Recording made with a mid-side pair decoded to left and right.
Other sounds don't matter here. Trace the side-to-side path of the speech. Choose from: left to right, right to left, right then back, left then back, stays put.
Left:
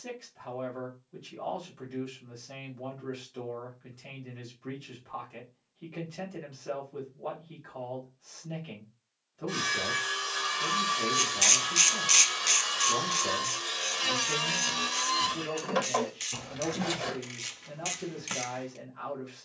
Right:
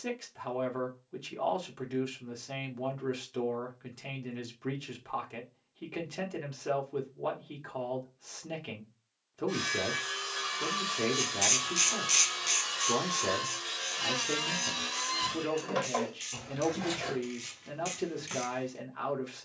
stays put.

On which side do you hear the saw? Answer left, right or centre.
left.